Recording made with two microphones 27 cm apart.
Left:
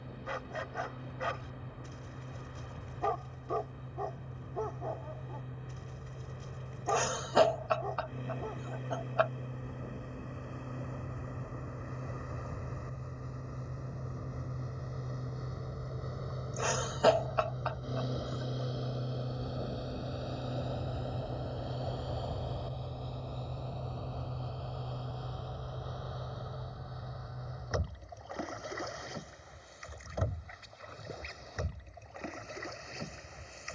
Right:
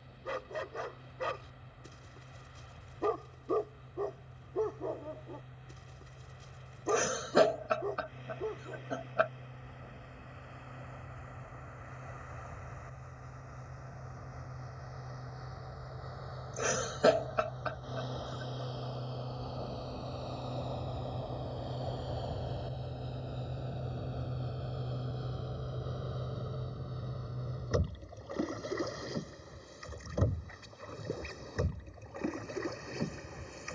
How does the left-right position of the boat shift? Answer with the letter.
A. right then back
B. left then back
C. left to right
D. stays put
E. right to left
C.